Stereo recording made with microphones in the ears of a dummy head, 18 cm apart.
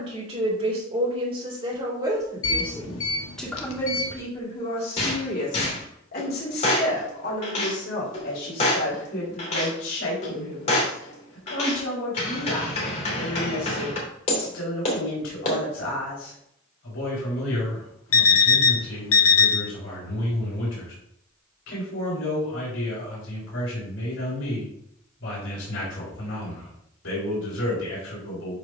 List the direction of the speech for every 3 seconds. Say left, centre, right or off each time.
right, left, left, left, left, left, left, left, left, left.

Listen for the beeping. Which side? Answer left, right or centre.
left.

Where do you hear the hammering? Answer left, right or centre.
left.